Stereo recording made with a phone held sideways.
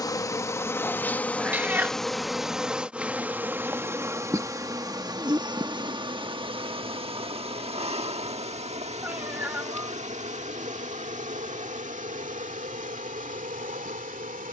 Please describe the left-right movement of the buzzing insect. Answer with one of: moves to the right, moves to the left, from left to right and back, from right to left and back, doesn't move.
moves to the right.